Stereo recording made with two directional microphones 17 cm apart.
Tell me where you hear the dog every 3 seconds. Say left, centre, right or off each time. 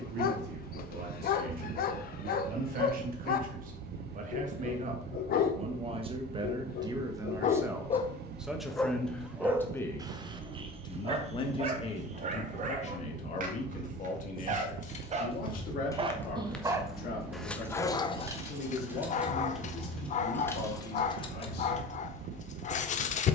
left, left, left, right, right, centre, left, left.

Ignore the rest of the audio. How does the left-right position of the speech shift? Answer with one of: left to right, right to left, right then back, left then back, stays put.
right to left.